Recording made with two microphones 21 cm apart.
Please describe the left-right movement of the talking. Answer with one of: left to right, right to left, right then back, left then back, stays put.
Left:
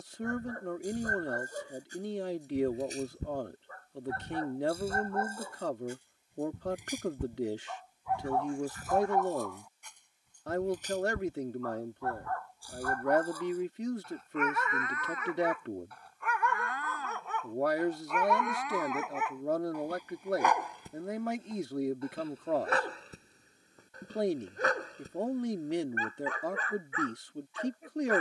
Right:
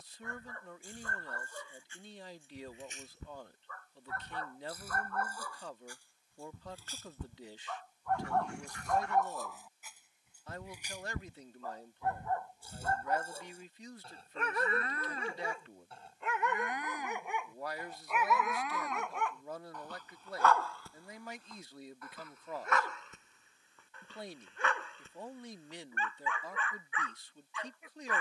stays put.